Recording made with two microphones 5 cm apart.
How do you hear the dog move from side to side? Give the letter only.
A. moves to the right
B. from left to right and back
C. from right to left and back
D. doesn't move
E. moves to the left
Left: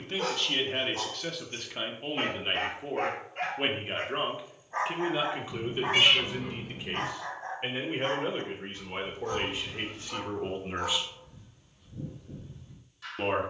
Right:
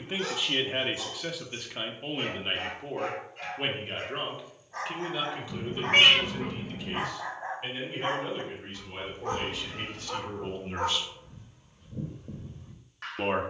A.